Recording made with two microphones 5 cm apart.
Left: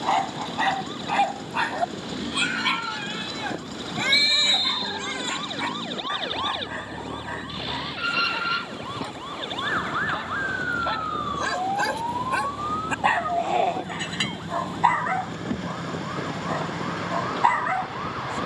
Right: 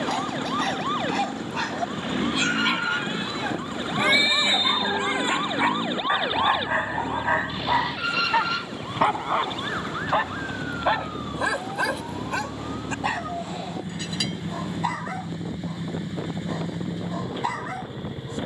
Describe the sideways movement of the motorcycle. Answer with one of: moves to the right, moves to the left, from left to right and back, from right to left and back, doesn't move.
doesn't move.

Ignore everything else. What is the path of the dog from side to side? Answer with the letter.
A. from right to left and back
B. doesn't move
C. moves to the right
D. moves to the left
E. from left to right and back
E.